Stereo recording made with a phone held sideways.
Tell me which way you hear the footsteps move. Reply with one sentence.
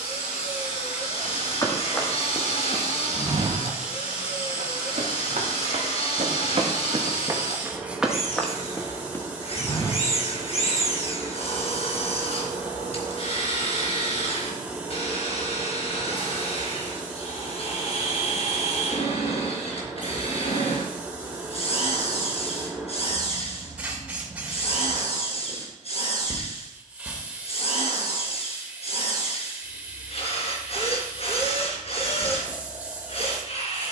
You can hear the footsteps move from left to right and back again.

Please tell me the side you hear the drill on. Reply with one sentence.
In this clip you hear the drill on the left.